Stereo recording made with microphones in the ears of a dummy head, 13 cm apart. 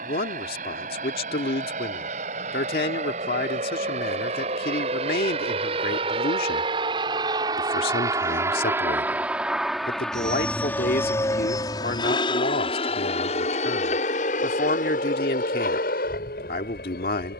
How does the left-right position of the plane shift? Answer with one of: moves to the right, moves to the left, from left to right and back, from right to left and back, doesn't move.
moves to the left.